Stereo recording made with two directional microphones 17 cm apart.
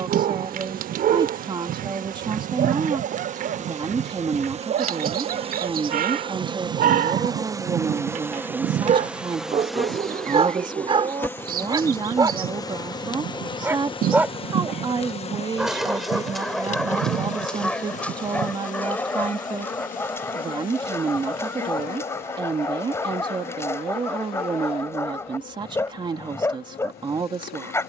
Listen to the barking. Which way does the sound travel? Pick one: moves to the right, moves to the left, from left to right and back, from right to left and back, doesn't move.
moves to the left.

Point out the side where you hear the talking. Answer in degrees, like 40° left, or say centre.
30° right.